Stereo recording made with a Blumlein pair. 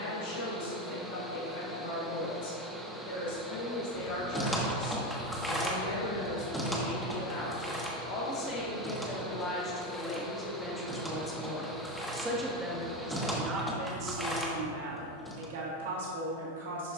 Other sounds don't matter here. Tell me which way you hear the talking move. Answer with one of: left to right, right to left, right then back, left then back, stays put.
left to right.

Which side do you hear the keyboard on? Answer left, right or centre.
centre.